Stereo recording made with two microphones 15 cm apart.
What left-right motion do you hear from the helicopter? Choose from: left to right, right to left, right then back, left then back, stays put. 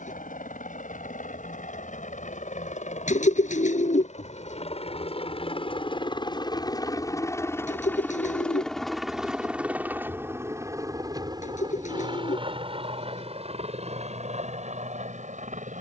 left to right.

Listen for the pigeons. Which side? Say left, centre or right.
left.